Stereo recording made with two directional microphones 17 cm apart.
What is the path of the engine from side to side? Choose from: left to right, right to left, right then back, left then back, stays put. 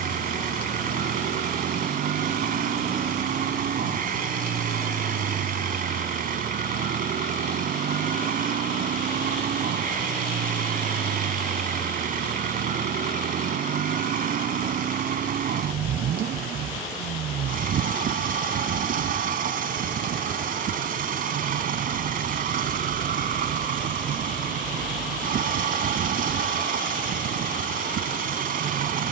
stays put.